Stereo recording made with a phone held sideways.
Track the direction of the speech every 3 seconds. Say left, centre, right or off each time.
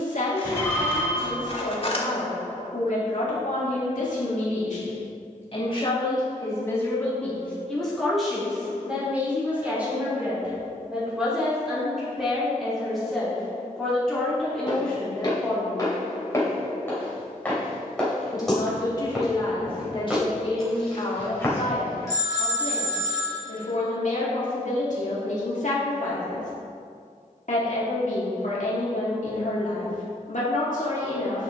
left, left, centre, centre, centre, centre, left, left, left, left, left.